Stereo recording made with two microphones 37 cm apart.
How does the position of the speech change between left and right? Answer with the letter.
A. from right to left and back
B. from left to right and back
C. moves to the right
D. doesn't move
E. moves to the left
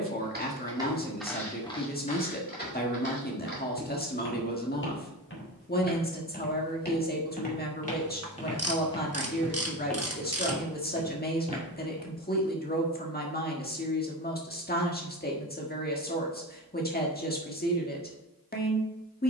D.